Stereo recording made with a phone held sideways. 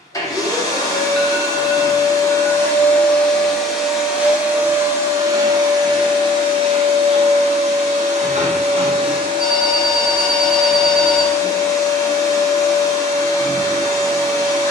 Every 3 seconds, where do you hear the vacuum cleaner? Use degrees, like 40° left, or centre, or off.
20° left, 10° right, 40° right, 10° right, 20° left.